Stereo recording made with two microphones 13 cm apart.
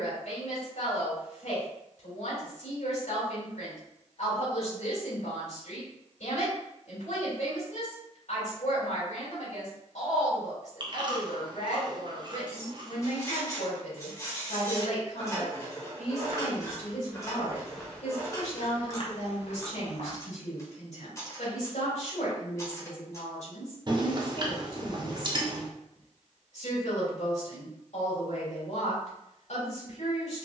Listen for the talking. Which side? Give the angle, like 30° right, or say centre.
60° left.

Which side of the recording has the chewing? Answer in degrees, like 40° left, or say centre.
40° right.